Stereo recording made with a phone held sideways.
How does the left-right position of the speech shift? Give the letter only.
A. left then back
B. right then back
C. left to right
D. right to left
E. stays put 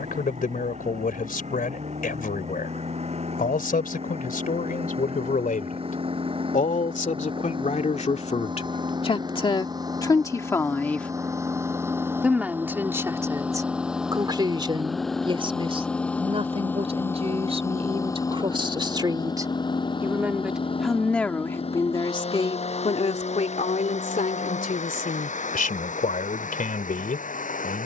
B.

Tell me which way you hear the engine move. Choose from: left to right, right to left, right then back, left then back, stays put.
right to left.